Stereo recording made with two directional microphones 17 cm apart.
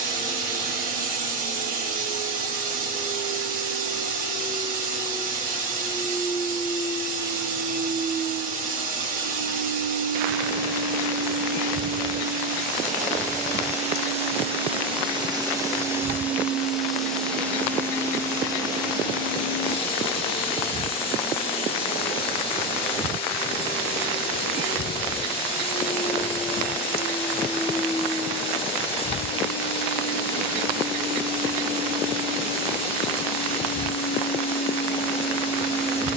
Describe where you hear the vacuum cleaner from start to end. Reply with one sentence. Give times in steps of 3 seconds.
In this clip you hear the vacuum cleaner on the right from 0 s, in the centre from 15 s and on the left from 18 s.